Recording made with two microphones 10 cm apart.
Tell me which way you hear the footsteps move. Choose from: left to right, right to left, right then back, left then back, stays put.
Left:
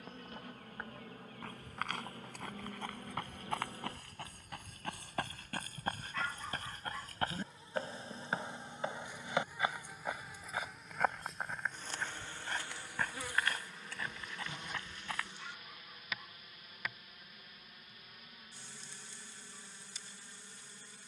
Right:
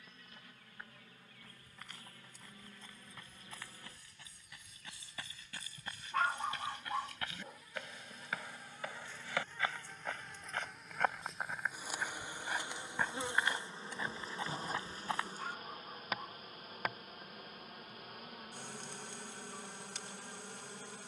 left to right.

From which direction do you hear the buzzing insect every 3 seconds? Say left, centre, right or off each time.
left, left, left, centre, right, right, right.